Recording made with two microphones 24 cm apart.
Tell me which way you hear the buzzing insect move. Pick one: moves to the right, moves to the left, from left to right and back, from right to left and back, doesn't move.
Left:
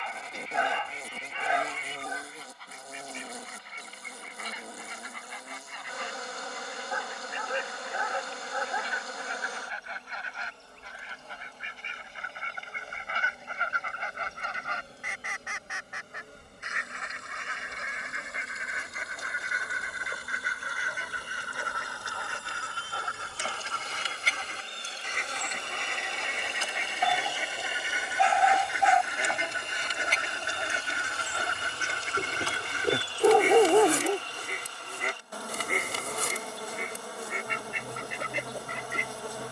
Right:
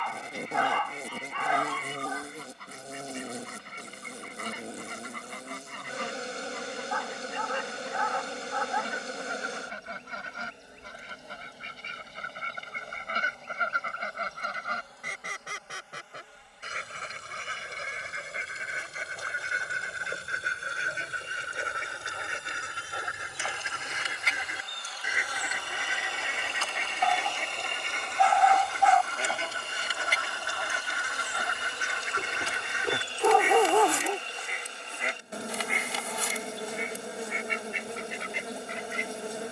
from right to left and back.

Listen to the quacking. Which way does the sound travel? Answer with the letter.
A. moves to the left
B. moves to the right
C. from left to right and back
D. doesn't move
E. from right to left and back
A.